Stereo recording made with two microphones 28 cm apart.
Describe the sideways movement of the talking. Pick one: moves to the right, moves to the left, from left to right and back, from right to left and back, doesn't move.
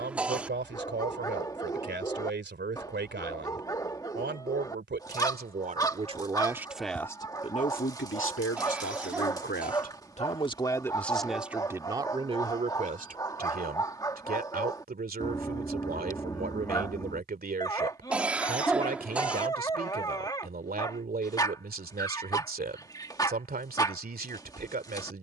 from right to left and back.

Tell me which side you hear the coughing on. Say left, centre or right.
centre.